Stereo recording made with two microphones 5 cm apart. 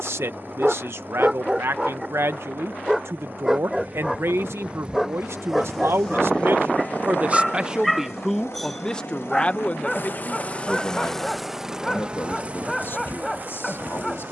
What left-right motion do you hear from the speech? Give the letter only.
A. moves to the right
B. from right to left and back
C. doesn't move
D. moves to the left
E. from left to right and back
D.